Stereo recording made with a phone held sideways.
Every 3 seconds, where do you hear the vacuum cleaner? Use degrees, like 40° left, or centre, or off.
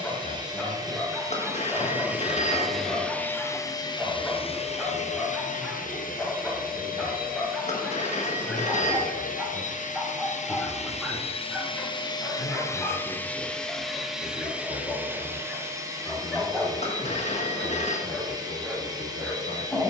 20° right, 40° left, 80° left, 50° left, 10° left, 20° right, 30° right.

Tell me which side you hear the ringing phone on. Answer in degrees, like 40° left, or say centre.
50° left.